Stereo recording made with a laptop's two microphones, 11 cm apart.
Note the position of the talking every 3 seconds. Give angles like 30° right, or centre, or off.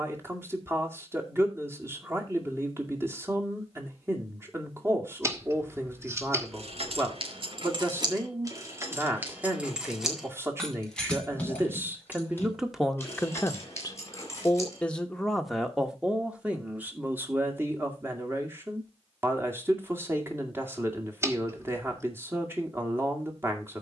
20° right, 20° right, 20° right, 20° right, 10° left, 10° right, 20° right, 20° right.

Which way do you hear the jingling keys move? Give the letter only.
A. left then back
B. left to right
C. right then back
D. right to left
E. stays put
D.